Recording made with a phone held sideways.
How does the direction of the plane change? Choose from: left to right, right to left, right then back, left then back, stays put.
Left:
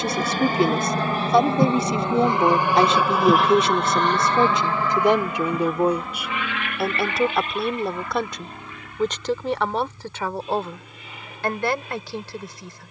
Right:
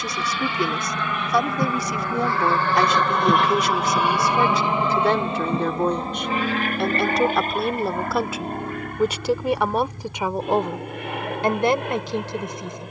left to right.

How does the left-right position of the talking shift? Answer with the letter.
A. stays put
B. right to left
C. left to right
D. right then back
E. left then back
C.